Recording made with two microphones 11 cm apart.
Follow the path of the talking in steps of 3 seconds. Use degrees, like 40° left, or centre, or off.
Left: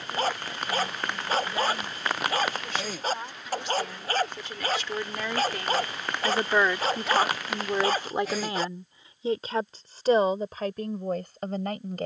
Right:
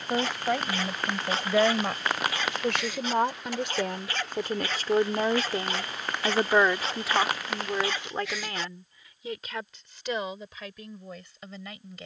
70° right, 50° right, centre, 40° left.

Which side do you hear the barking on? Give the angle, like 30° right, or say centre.
40° left.